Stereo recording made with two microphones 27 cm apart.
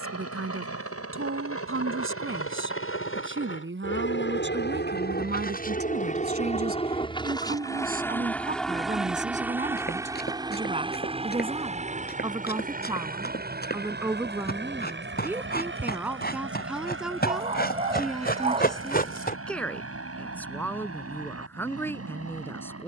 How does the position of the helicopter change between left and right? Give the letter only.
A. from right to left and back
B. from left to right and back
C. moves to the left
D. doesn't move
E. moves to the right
E.